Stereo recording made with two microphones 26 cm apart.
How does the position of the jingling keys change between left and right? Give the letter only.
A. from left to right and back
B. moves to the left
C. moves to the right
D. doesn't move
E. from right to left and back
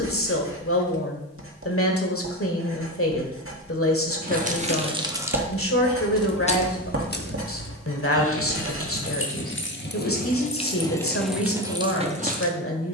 E.